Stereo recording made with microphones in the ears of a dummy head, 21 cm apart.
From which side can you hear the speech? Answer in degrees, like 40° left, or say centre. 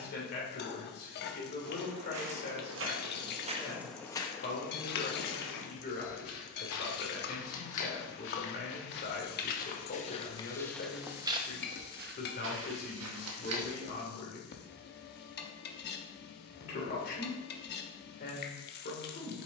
50° left.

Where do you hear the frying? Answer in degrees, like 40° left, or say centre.
50° left.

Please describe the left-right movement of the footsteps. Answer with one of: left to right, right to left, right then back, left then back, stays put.
left then back.